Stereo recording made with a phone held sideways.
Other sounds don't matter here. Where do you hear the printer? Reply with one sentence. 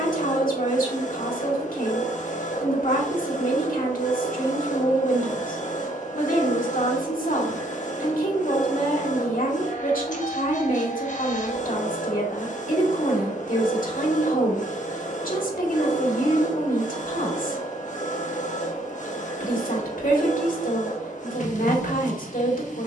In this clip you hear the printer on the left.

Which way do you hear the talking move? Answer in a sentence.
In this clip you hear the talking stay in one place.